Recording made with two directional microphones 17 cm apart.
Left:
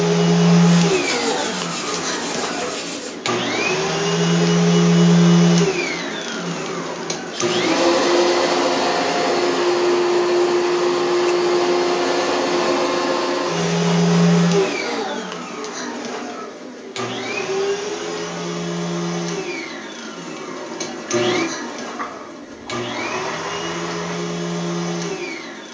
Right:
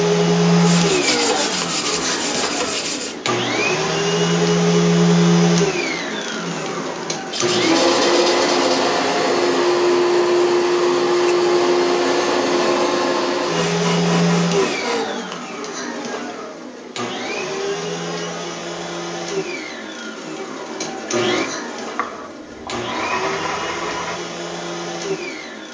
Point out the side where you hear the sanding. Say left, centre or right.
right.